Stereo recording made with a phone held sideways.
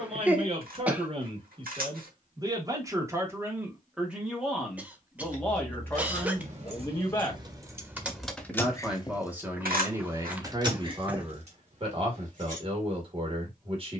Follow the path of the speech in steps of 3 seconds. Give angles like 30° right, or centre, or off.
40° right, centre, 10° left, 20° right, 40° right.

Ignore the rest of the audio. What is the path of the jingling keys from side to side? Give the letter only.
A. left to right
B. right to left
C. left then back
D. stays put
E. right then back
C.